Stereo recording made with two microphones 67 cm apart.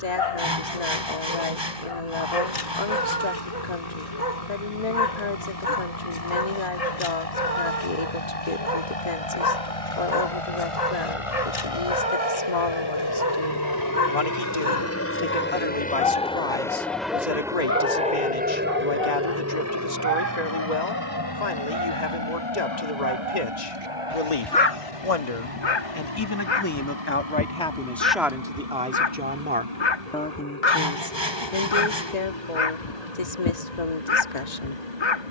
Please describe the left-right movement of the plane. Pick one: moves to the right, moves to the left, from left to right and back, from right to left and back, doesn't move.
moves to the right.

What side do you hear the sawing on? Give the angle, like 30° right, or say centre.
40° right.